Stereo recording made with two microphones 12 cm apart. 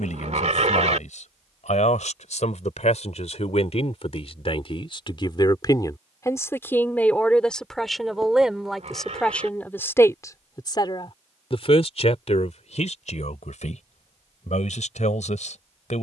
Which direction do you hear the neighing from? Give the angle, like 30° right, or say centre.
70° right.